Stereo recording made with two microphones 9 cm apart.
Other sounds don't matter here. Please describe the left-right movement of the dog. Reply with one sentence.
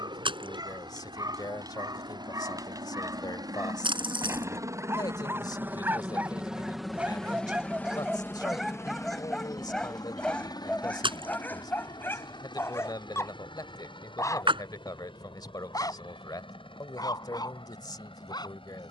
You can hear the dog travel towards the left.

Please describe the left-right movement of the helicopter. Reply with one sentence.
In this clip you hear the helicopter move to the left.